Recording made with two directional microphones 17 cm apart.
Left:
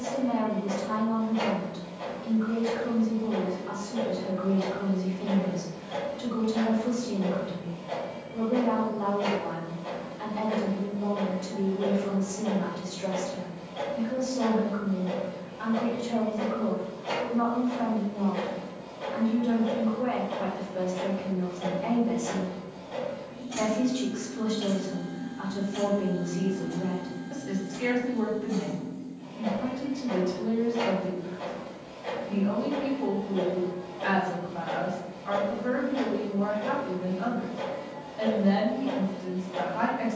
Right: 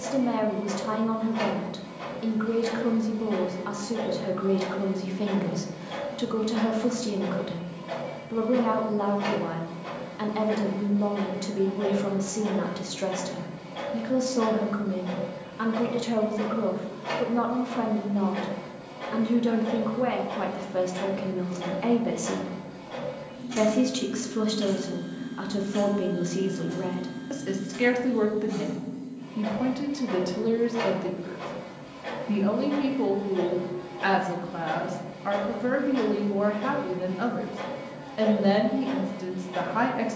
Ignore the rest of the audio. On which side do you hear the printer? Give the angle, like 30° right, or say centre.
30° right.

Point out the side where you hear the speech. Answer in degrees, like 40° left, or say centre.
70° right.